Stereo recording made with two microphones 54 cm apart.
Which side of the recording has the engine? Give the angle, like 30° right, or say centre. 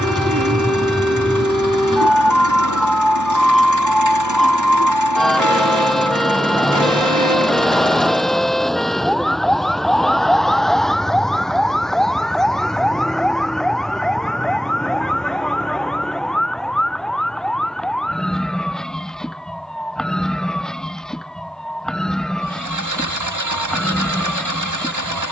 30° right.